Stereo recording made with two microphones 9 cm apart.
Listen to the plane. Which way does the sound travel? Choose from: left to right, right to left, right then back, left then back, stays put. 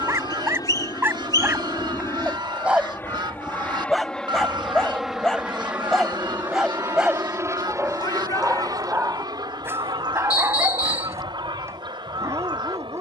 left to right.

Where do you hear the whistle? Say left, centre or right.
left.